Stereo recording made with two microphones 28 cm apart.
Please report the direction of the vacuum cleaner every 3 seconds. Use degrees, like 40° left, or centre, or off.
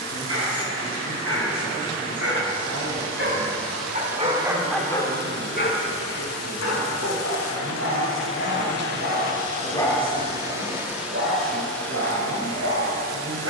20° left, 20° right, 50° right, 10° right, 10° left.